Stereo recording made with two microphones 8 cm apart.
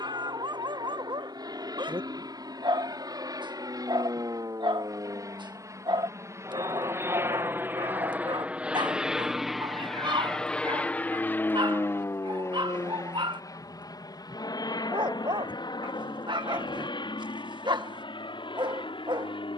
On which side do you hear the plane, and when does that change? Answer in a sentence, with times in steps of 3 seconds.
In this clip you hear the plane on the right from 0 s, in the centre from 9 s and on the left from 12 s.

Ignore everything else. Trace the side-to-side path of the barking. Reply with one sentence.
In this clip you hear the barking stay in one place.